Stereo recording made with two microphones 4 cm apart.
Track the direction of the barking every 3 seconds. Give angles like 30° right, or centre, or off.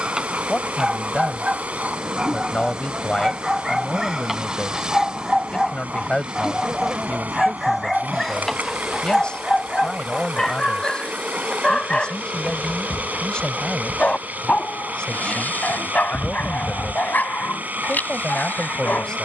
20° right, 10° right, centre, 20° left, 30° left, 40° left, 50° left.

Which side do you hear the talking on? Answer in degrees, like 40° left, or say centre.
20° left.